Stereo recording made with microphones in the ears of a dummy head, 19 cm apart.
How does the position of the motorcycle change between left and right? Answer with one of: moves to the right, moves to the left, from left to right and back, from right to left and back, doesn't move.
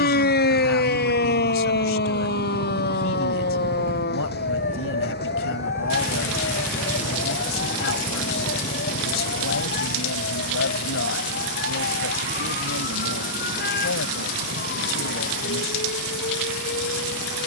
moves to the left.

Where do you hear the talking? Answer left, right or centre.
left.